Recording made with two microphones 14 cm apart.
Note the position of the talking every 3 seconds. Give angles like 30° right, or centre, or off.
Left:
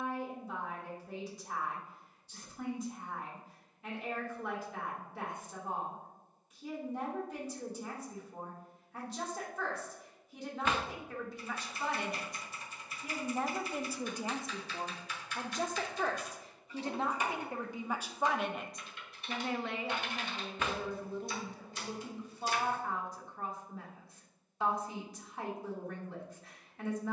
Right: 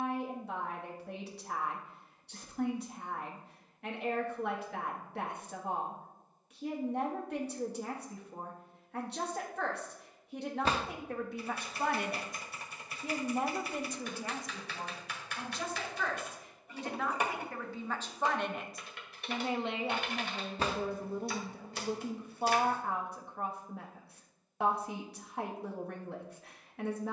70° right, 70° right, 70° right, 60° right, centre, 30° left, 20° right, 60° right, 60° right.